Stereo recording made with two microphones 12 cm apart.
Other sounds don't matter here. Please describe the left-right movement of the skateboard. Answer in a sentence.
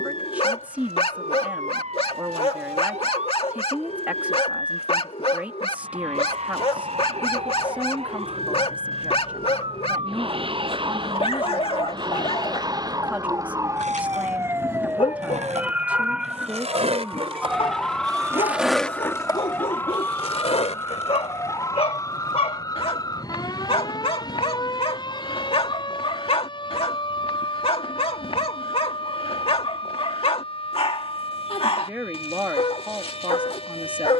You can hear the skateboard go from the right side to the left.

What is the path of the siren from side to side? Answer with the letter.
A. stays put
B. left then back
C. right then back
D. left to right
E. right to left
E.